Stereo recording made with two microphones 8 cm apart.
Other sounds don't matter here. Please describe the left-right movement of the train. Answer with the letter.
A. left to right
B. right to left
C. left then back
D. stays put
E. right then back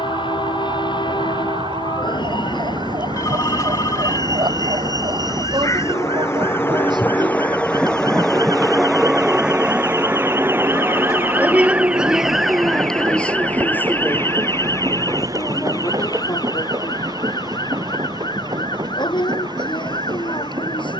A.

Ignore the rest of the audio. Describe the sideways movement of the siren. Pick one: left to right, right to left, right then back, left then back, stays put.
right to left.